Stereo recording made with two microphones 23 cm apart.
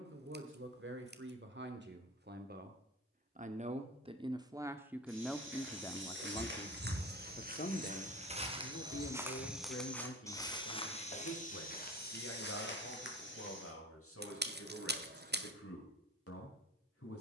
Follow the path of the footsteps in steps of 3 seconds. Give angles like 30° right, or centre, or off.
off, 60° right, 40° right, 20° left, 50° left, off.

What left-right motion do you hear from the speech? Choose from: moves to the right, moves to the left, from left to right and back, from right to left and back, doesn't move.
moves to the left.